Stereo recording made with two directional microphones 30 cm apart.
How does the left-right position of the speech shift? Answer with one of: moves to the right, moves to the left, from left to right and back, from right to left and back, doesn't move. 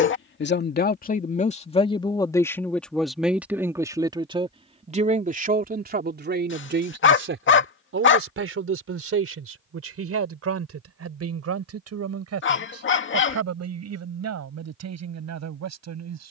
moves to the right.